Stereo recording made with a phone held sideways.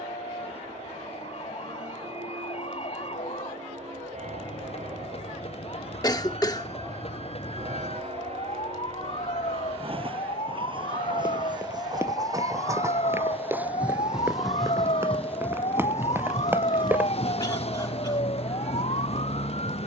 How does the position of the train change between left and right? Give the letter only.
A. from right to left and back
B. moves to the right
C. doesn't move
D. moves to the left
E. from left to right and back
D.